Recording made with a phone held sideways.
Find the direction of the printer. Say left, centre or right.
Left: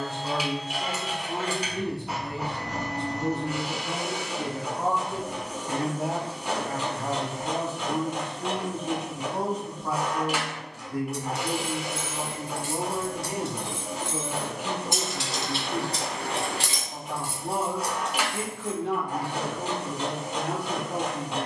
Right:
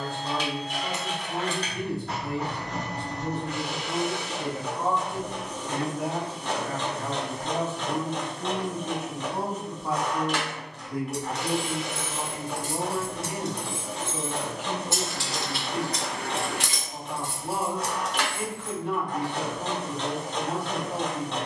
centre.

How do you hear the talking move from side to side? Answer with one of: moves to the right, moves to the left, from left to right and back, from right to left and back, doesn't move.
from left to right and back.